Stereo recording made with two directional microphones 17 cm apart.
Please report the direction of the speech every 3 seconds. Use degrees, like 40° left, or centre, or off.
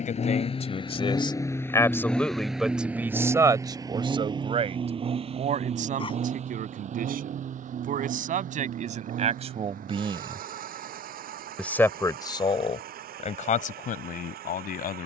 20° left, 30° right, 50° right, 20° right, 50° left.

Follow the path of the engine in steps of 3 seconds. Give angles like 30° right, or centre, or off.
20° left, 30° right, 50° right, 60° right, 60° right.